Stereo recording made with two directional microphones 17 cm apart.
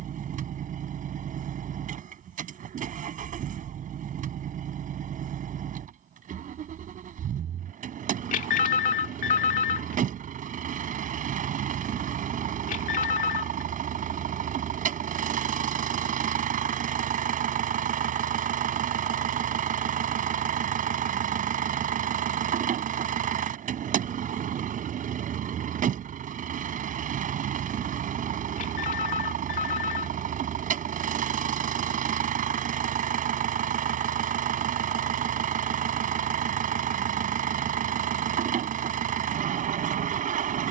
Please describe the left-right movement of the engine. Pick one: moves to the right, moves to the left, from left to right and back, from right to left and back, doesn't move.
doesn't move.